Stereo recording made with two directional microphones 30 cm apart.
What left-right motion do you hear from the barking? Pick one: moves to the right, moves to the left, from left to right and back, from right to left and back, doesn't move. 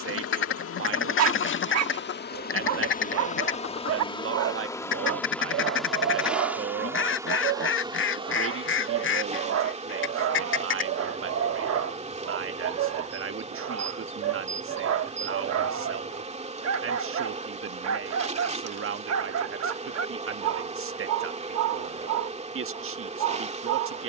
doesn't move.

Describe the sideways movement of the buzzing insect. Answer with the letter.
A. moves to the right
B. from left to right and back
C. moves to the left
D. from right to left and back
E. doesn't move
A.